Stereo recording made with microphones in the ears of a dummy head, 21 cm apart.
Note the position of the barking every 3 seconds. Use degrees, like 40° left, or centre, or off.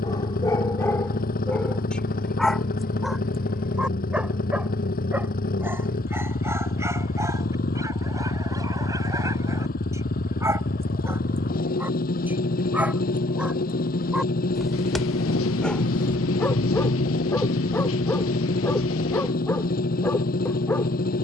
10° left, 10° right, 10° right, 10° right, 10° right, 10° left, 10° left.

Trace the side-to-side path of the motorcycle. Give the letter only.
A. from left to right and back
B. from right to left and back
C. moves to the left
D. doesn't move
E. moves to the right
D.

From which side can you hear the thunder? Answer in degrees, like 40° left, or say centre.
60° left.